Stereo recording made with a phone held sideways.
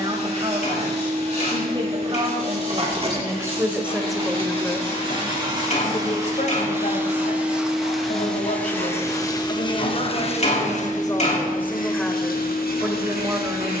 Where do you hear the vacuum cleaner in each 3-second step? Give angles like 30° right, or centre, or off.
40° right, 30° right, 10° right, 40° left, 70° left.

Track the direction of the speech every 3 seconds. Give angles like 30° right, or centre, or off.
30° right, centre, 60° left, 30° left, 10° right.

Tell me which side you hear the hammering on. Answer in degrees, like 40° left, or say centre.
50° left.